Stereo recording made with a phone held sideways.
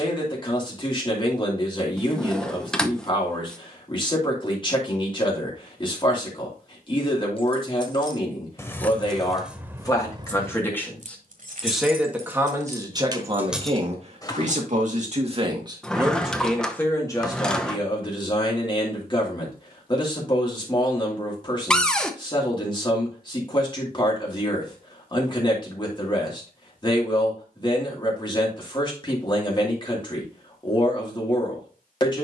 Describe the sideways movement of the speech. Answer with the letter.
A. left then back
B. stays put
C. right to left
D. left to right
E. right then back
E.